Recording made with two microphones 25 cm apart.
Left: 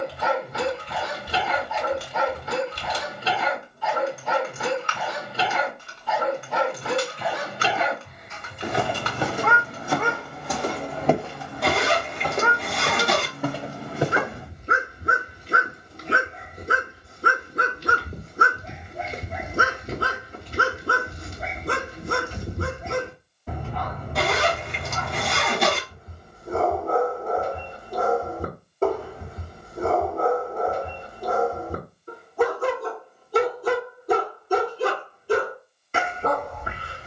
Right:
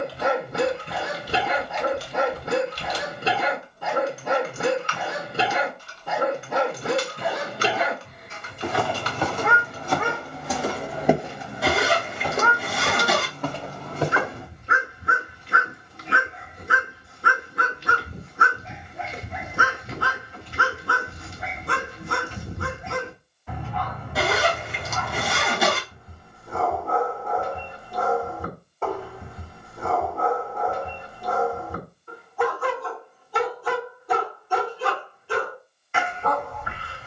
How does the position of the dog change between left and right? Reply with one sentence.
In this clip you hear the dog go from the right side to the left.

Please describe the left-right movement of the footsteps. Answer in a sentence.
In this clip you hear the footsteps go right and come back.